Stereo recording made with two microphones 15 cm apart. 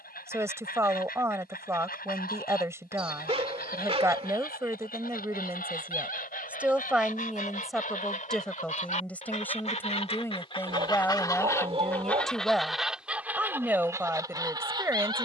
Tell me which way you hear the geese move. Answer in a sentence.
You can hear the geese move to the right.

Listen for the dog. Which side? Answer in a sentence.
You can hear the dog on the right.